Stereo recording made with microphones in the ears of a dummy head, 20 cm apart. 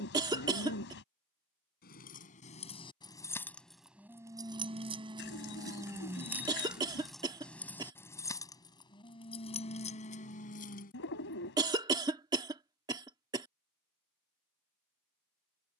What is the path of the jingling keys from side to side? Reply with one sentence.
In this clip you hear the jingling keys move from left to right and back again.